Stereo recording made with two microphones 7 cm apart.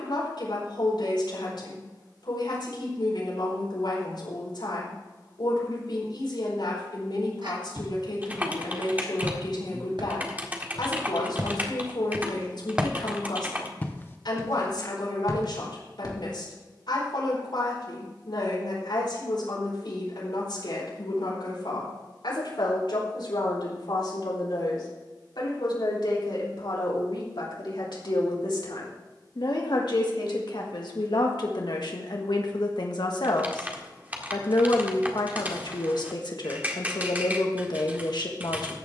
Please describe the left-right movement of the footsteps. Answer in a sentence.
In this clip you hear the footsteps move from right to left.